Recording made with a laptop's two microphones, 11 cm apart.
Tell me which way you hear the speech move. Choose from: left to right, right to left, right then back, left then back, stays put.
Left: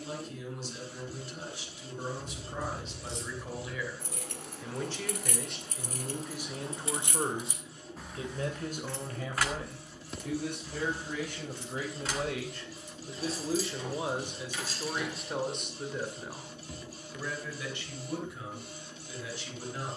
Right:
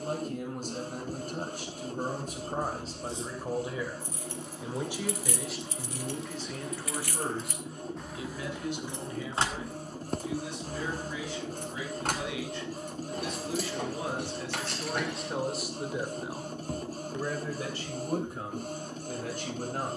left then back.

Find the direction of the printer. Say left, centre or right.
right.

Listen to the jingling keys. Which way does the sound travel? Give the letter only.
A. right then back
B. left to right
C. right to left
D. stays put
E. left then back
B.